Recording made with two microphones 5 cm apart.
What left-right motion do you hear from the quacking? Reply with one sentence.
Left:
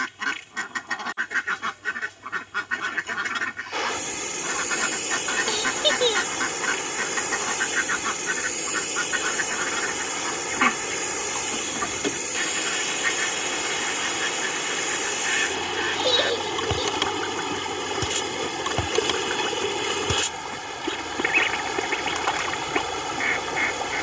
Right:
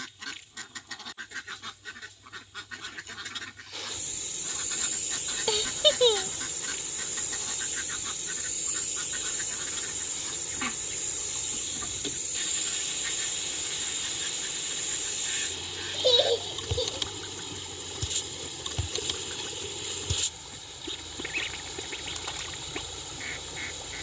In this clip you hear the quacking stay in one place.